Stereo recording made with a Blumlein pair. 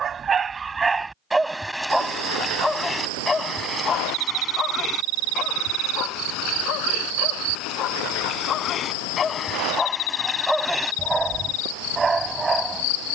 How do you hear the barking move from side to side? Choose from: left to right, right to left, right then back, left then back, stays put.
left then back.